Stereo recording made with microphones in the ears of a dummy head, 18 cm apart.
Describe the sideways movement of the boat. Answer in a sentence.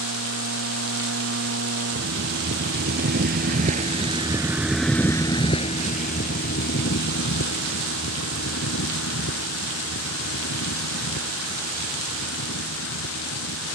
In this clip you hear the boat move to the left.